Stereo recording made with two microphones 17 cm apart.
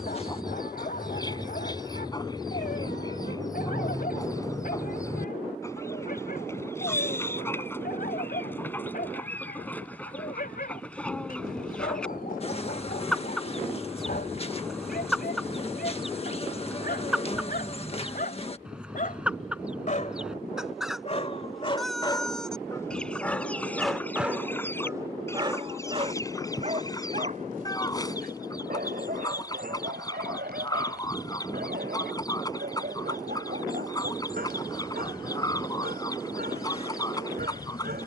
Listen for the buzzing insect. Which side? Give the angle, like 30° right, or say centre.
40° left.